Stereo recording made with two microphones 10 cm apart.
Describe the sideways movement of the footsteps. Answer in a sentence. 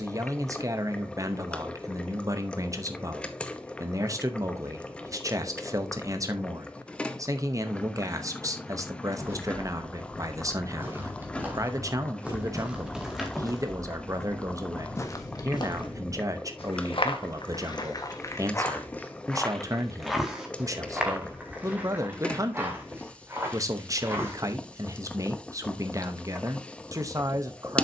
You can hear the footsteps move from right to left and back again.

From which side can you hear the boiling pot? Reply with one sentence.
You can hear the boiling pot in the centre.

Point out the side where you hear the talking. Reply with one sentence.
You can hear the talking on the right.